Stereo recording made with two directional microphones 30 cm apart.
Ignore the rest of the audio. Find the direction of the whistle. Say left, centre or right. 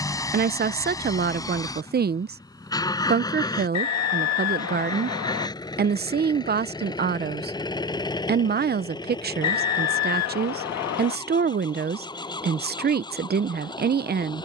left.